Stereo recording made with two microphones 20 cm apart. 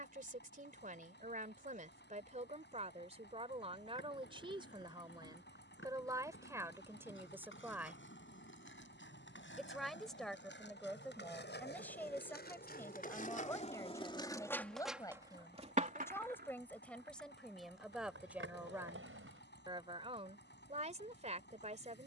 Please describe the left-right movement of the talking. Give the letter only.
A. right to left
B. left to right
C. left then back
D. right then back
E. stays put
C.